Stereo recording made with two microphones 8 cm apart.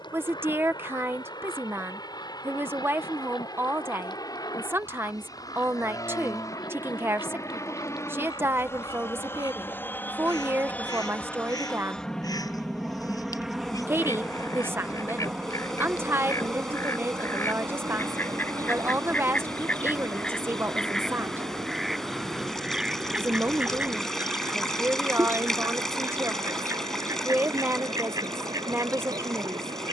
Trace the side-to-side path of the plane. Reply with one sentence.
In this clip you hear the plane go from the left side to the right.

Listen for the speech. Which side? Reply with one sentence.
In this clip you hear the speech on the right.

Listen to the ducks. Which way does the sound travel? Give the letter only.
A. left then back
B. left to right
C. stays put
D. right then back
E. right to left
B.